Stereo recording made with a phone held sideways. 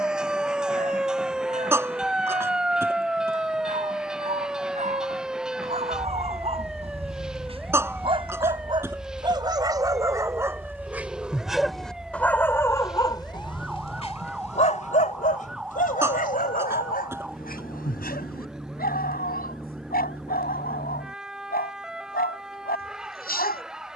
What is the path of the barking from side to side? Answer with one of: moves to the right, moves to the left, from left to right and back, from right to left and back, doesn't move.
moves to the left.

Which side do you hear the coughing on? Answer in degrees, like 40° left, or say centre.
20° right.